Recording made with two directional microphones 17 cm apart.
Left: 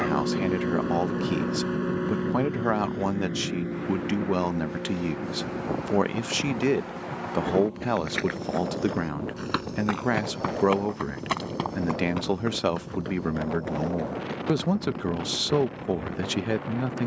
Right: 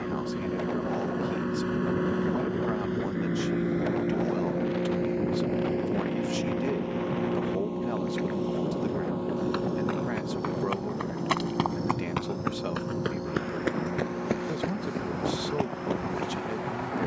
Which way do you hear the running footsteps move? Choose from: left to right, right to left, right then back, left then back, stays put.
left to right.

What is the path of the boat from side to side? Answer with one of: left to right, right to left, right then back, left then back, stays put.
left to right.